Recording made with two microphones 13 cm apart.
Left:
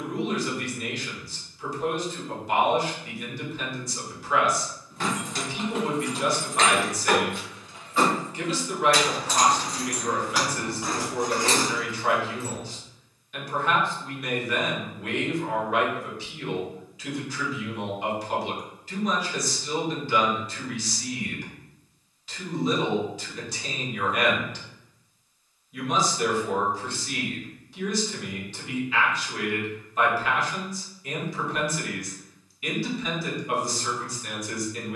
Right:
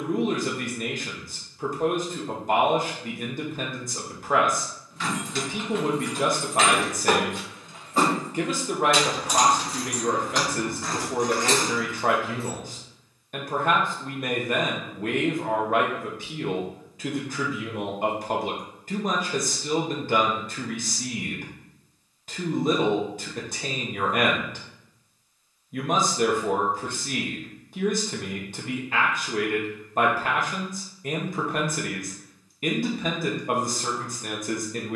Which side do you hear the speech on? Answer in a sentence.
In this clip you hear the speech on the right.